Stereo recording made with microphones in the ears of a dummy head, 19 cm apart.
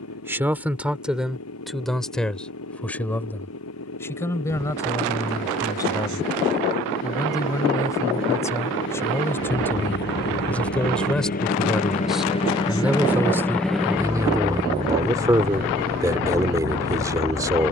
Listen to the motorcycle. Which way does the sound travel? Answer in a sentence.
In this clip you hear the motorcycle travel towards the right.